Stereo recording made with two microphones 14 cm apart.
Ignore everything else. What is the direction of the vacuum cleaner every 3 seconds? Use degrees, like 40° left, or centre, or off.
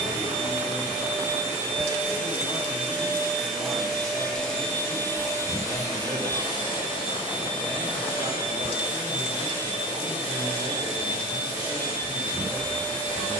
20° right, 10° left, 40° left, 40° left, 40° left.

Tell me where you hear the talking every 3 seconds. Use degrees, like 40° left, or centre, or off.
10° left, 10° right, 40° right, 60° right, 60° right.